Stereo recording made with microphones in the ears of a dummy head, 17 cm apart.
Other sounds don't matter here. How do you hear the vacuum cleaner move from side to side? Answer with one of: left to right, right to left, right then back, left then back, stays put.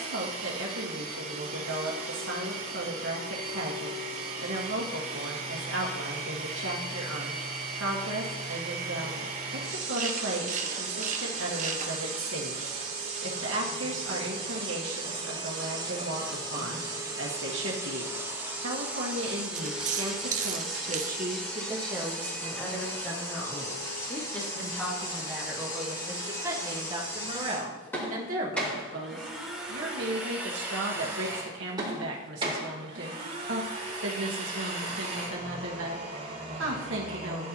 left then back.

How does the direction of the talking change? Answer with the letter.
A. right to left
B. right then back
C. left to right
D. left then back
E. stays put
D.